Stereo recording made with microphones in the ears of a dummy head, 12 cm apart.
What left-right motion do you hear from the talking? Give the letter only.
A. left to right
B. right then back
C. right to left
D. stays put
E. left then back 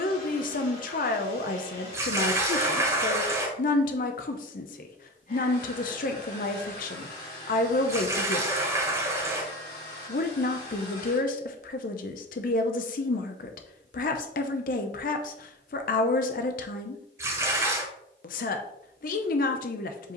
D.